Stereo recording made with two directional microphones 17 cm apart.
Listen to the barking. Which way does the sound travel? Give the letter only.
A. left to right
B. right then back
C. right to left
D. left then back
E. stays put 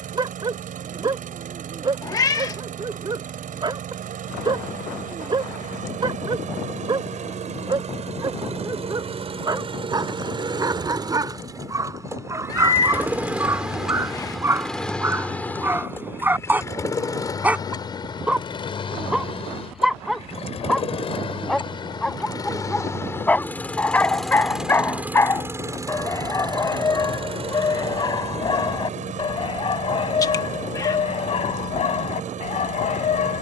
C.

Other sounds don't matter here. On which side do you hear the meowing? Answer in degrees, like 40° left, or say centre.
20° left.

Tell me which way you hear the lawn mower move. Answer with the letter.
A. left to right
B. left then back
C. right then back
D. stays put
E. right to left
B.